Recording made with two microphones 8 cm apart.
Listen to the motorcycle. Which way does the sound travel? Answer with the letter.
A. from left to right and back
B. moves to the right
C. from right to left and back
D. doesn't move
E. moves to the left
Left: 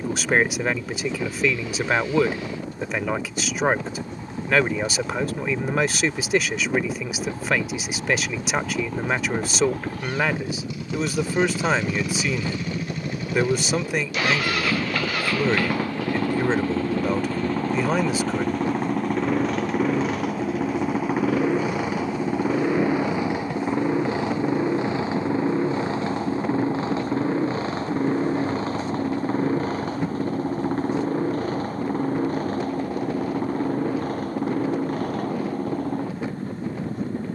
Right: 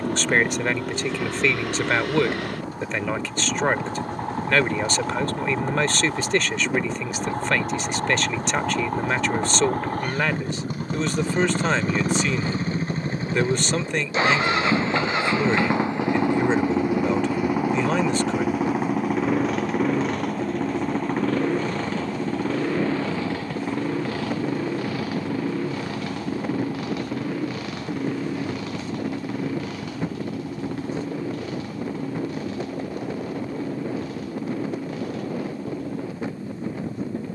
E.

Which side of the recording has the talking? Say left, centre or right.
centre.